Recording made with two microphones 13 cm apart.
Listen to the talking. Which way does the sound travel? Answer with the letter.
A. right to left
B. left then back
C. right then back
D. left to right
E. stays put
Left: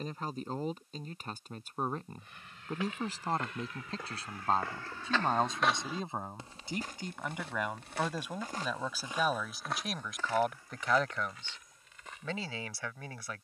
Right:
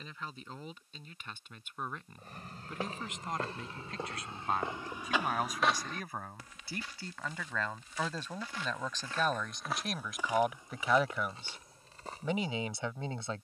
D.